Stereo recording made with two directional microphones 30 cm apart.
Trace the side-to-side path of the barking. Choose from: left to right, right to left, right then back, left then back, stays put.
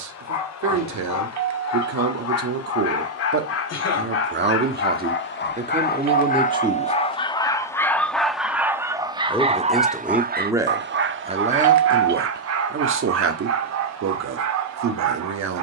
left to right.